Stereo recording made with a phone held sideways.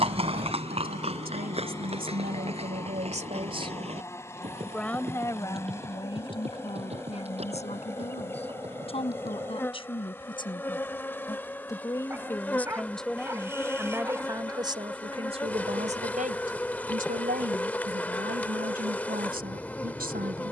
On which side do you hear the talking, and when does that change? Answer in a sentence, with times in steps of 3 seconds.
You can hear the talking on the right from 0 s, in the centre from 3 s, on the left from 6 s, in the centre from 12 s and on the right from 15 s.